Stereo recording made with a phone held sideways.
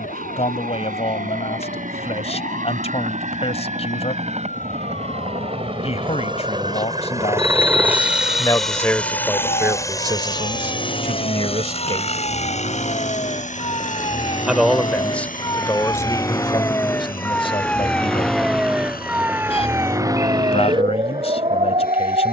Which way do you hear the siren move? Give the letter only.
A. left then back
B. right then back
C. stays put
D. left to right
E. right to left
D.